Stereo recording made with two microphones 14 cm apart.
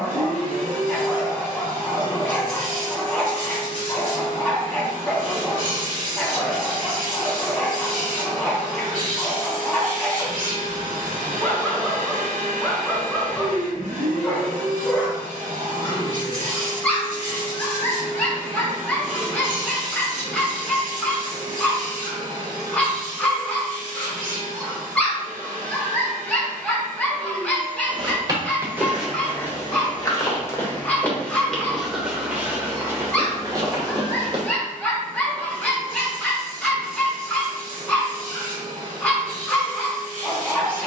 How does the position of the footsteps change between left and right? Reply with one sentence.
In this clip you hear the footsteps move from right to left and back again.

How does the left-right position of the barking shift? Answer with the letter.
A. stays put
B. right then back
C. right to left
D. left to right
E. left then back
A.